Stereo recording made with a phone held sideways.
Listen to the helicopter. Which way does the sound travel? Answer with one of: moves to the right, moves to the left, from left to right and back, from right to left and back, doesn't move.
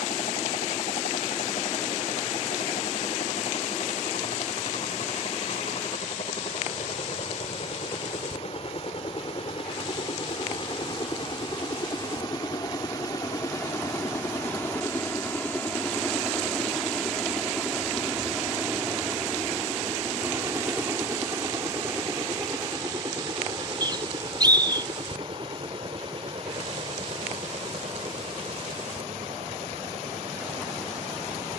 moves to the right.